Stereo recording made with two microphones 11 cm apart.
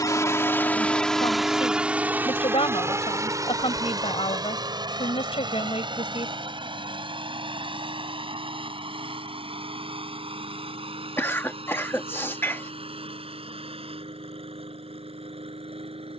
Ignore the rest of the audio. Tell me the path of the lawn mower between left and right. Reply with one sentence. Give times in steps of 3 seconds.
You can hear the lawn mower in the centre from 0 s and on the right from 3 s.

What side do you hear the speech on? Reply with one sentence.
You can hear the speech on the left.